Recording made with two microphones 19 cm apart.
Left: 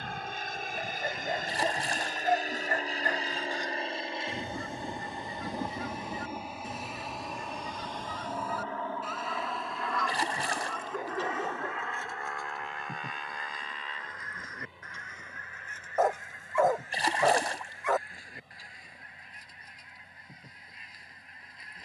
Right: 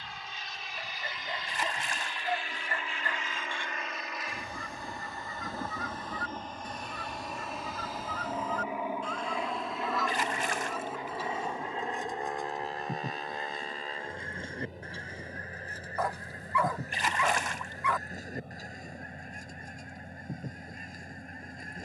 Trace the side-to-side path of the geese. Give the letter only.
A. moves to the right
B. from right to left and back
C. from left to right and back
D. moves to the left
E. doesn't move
A.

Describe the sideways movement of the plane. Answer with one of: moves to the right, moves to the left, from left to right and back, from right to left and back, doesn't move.
moves to the right.